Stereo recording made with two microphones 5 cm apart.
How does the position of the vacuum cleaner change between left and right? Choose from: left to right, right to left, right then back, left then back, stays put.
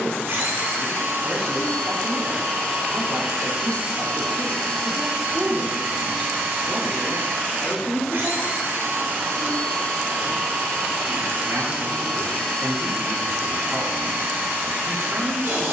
stays put.